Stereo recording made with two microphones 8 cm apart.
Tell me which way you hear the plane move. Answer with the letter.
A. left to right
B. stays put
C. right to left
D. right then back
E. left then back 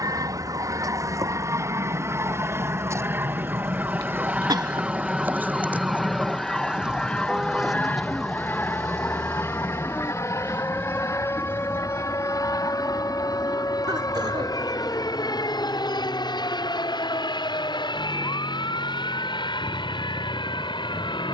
C.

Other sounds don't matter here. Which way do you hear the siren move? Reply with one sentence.
You can hear the siren move from right to left.